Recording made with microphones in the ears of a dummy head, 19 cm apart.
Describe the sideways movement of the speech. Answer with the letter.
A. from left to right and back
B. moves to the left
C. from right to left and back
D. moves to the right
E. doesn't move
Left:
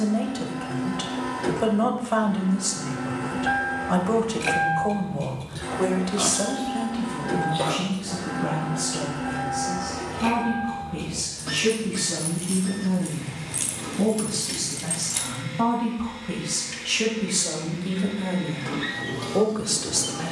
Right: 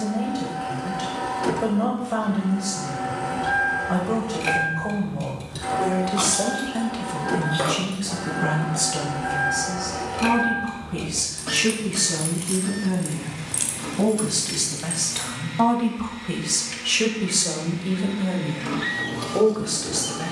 A.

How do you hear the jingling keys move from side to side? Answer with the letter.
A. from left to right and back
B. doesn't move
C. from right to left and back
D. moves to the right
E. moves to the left
A.